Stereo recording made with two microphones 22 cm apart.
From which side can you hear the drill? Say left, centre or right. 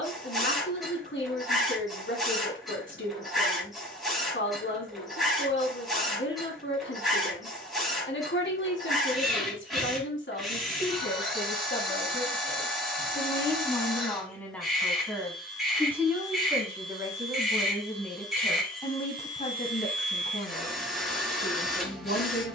centre.